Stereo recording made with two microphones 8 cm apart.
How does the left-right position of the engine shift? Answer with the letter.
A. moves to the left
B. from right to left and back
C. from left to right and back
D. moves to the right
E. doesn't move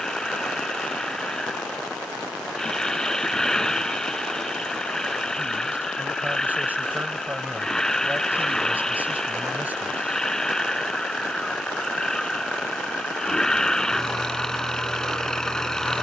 E.